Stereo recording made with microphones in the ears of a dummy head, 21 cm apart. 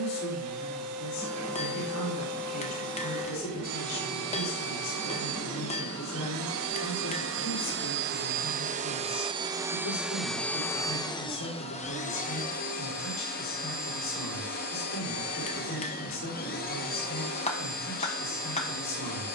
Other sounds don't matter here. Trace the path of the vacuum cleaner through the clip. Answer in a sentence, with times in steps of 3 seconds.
In this clip you hear the vacuum cleaner on the right from 0 s, in the centre from 9 s and on the left from 12 s.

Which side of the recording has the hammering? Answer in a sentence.
You can hear the hammering on the left.